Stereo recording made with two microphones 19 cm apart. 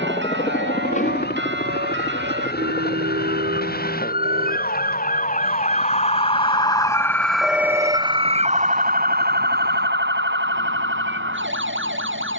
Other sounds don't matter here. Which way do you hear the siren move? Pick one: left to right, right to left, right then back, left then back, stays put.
left to right.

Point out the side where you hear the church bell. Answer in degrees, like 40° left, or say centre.
80° right.